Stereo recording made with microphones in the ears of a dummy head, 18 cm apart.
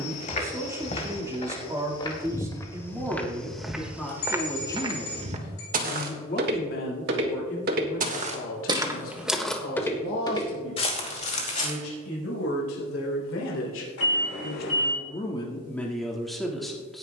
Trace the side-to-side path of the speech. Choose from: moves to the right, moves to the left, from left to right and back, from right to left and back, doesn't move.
from right to left and back.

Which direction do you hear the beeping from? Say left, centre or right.
left.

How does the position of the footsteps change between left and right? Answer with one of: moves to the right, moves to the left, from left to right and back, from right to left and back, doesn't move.
from left to right and back.